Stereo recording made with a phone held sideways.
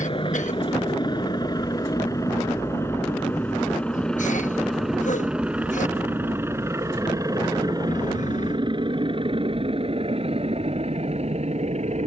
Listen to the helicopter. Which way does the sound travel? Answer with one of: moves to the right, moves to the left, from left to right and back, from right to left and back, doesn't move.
moves to the right.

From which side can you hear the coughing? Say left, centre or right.
left.